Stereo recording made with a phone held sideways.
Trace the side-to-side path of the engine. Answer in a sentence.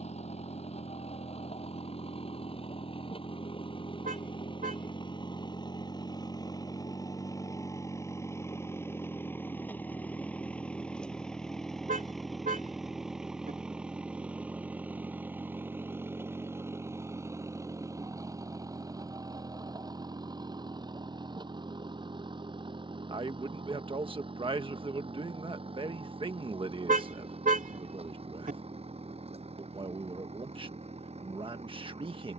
In this clip you hear the engine move from left to right.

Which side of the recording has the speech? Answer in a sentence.
You can hear the speech on the right.